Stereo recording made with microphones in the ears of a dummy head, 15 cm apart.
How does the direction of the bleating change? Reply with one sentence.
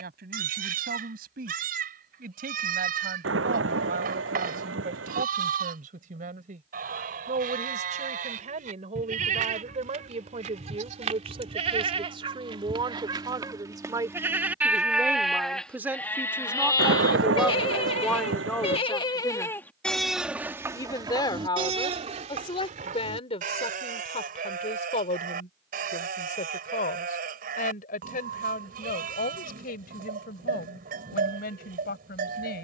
In this clip you hear the bleating move from right to left and back again.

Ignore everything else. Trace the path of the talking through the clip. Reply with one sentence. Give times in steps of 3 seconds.
In this clip you hear the talking on the right from 0 s, in the centre from 15 s and on the left from 21 s.